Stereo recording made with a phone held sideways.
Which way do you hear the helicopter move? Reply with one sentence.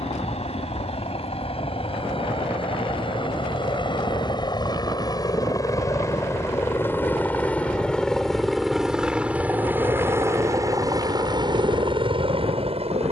You can hear the helicopter move from left to right.